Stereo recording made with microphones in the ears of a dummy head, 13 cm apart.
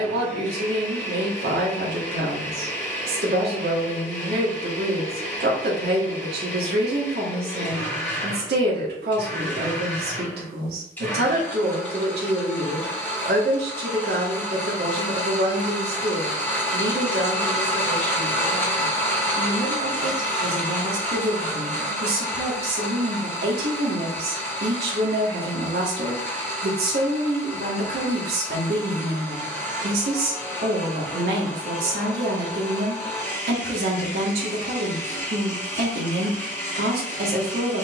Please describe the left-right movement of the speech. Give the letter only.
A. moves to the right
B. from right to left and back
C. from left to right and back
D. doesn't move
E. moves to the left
D.